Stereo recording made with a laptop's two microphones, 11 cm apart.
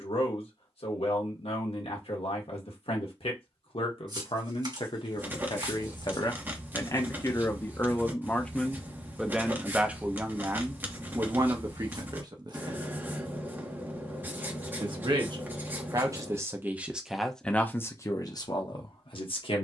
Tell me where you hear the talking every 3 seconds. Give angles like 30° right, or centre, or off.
60° left, 50° left, 20° left, 20° right, 40° right, 20° right, 50° left.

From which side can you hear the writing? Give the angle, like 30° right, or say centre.
20° right.